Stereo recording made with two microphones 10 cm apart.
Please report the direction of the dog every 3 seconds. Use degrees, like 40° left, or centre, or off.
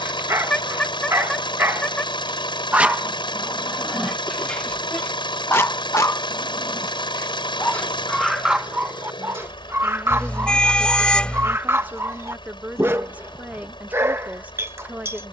20° right, 10° left, 10° left, 20° right, 20° right.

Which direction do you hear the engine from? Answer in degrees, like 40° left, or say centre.
50° left.